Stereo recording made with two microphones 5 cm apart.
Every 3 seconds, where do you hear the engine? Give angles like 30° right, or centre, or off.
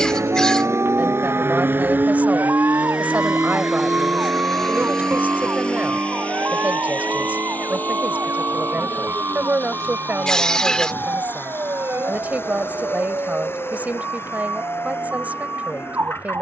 40° right, 10° left, 30° left, 40° left, 50° left, 50° left.